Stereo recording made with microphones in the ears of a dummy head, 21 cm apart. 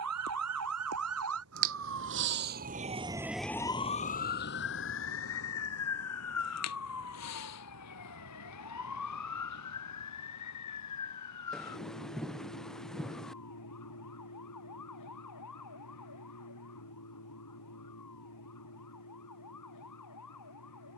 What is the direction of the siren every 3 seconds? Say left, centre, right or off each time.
right, left, left, left, left, left, left.